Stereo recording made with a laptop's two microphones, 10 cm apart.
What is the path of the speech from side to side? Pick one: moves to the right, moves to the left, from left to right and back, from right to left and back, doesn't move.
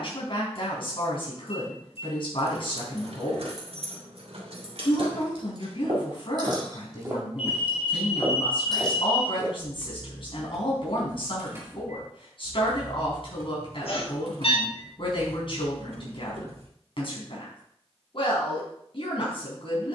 doesn't move.